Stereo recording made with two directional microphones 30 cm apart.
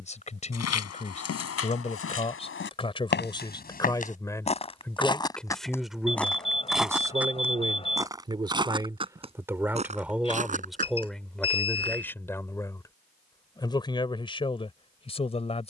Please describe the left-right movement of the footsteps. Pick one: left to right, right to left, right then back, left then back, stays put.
left to right.